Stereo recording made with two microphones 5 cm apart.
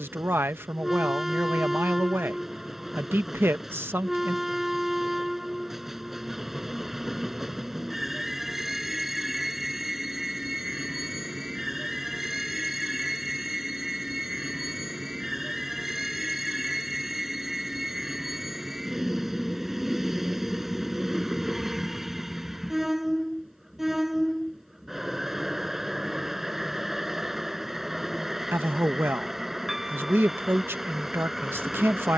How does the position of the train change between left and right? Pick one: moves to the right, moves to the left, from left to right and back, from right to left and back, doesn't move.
doesn't move.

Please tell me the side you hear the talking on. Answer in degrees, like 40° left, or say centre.
40° right.